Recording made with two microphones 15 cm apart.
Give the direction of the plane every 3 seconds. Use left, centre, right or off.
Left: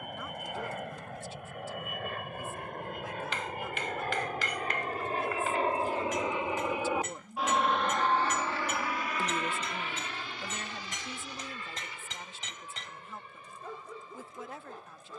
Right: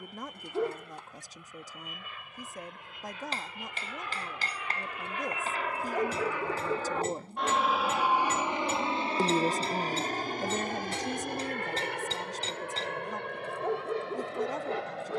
left, left, centre, right, right.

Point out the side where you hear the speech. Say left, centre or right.
right.